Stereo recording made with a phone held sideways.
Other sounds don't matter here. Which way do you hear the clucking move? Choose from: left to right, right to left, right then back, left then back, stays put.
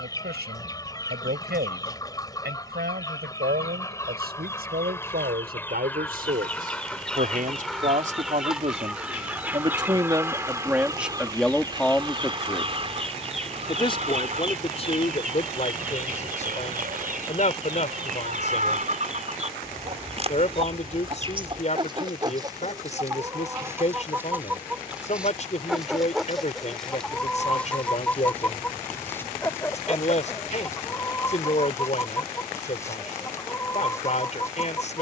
right then back.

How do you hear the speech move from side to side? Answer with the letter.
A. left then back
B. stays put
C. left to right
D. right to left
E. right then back
D.